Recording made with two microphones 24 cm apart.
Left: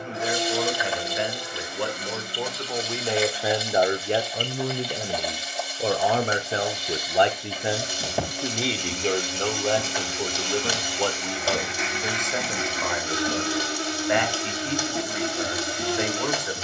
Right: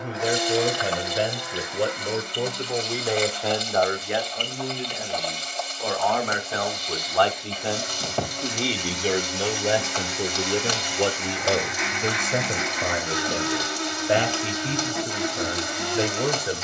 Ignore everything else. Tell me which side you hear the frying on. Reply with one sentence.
In this clip you hear the frying in the centre.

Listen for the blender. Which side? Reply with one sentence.
You can hear the blender on the left.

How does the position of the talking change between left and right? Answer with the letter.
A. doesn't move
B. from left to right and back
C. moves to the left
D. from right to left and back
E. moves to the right
D.